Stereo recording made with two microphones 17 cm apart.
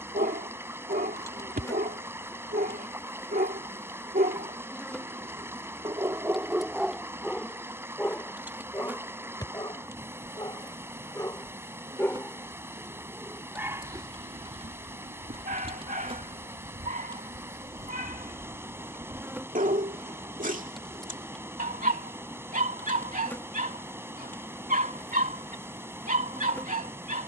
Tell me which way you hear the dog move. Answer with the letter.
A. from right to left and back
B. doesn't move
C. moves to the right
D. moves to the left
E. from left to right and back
A.